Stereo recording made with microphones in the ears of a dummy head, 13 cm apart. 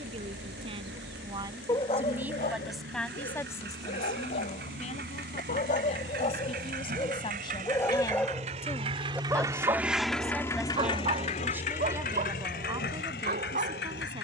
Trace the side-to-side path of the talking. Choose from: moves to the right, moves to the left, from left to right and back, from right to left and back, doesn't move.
from right to left and back.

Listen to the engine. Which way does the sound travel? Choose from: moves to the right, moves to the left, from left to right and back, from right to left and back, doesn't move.
moves to the left.